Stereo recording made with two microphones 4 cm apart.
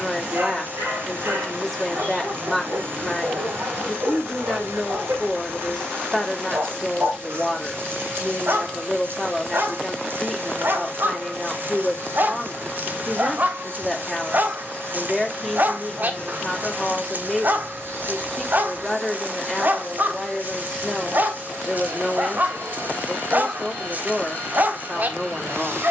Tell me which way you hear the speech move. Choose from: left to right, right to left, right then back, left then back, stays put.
stays put.